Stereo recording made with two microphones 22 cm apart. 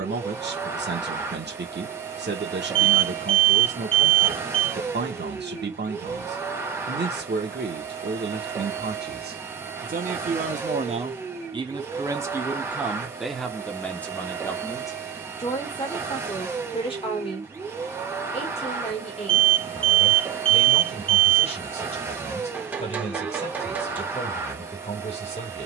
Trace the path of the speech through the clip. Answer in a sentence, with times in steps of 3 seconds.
You can hear the speech on the right from 0 s, in the centre from 12 s and on the left from 15 s.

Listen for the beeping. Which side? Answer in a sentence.
You can hear the beeping on the right.